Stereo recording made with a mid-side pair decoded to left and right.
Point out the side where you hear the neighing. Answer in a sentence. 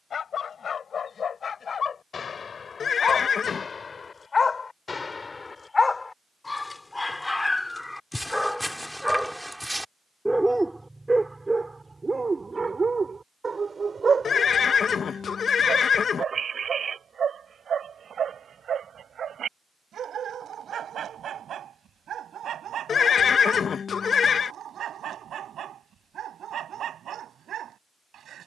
You can hear the neighing on the left.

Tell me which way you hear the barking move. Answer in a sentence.
You can hear the barking move to the right.